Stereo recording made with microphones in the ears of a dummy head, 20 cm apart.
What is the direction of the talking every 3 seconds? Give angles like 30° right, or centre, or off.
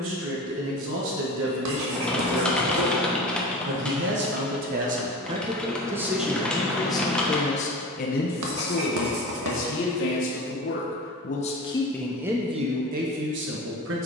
60° right, 40° right, 30° left, 40° left, 40° right.